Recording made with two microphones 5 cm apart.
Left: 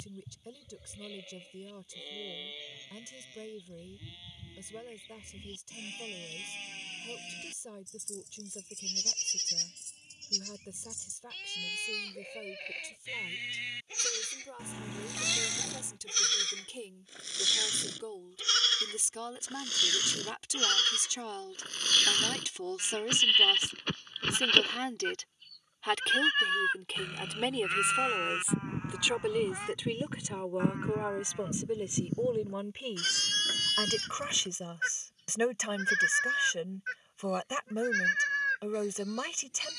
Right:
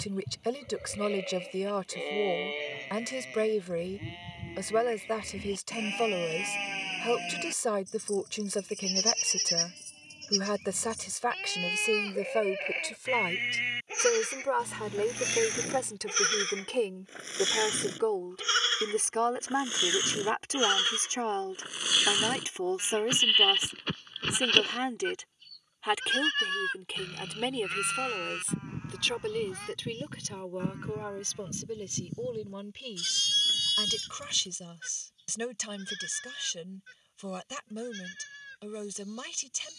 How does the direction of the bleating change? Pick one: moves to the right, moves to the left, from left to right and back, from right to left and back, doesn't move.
moves to the left.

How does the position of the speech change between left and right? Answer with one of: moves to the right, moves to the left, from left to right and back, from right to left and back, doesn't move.
moves to the left.